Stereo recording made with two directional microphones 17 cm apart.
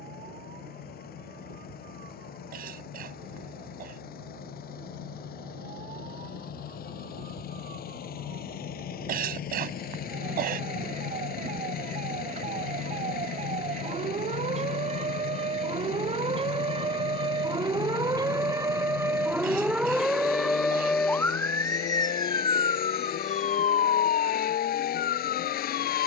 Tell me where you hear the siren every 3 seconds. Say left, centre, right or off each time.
right, right, right, right, right, right, centre, left, left.